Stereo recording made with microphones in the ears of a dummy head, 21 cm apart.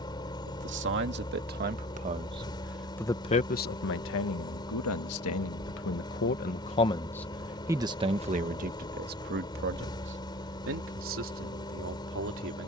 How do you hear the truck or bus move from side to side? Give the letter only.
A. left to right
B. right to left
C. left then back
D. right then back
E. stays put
E.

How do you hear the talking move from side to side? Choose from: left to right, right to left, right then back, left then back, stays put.
left then back.